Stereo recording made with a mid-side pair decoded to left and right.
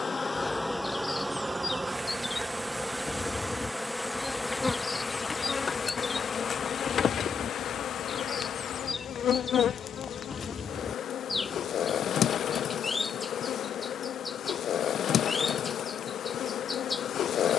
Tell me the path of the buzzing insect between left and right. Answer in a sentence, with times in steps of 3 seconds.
In this clip you hear the buzzing insect in the centre from 0 s and on the left from 6 s.